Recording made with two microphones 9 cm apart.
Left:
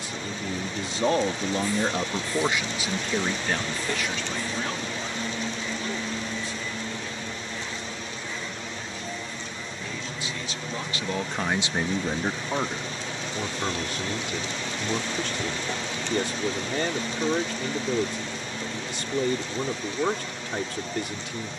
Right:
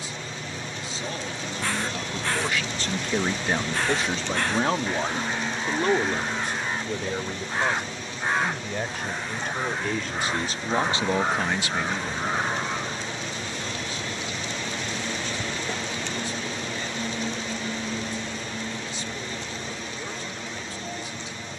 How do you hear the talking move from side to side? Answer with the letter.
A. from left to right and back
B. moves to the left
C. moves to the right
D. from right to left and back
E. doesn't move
A.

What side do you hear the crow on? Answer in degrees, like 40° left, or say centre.
80° right.